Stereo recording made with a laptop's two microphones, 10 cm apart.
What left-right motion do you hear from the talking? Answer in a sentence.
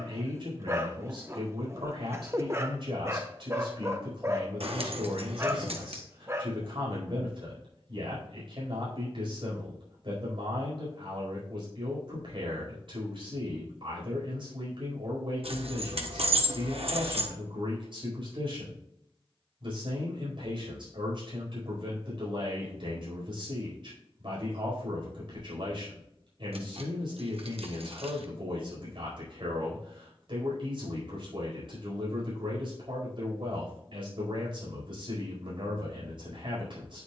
You can hear the talking stay in one place.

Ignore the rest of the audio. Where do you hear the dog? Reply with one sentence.
You can hear the dog on the right.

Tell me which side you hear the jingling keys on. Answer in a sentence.
You can hear the jingling keys on the right.